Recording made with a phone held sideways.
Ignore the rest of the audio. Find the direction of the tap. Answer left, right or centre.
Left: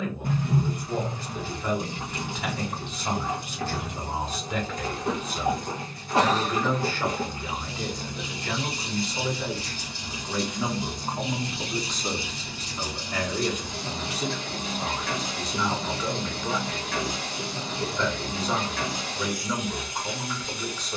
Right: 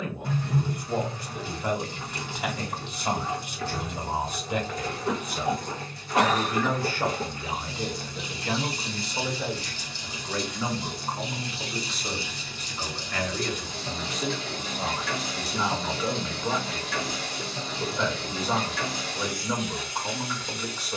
left.